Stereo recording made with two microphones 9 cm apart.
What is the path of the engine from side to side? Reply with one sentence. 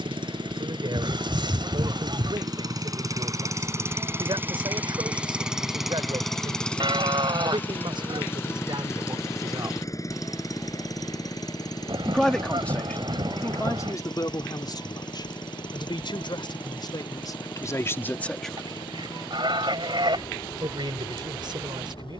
In this clip you hear the engine move to the left.